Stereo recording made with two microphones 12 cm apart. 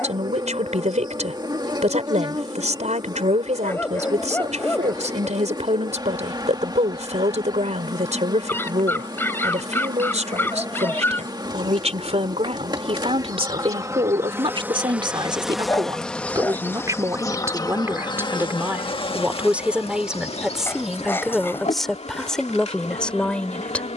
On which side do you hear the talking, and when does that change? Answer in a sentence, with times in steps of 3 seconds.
In this clip you hear the talking on the right from 0 s and in the centre from 18 s.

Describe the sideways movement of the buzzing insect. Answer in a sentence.
You can hear the buzzing insect move to the left.